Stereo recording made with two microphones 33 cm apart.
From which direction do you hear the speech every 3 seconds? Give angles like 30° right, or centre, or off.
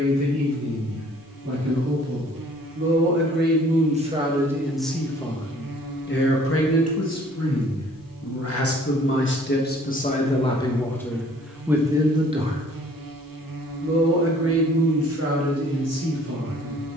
50° right, 10° right, 50° left, 20° left, 30° right, 50° right.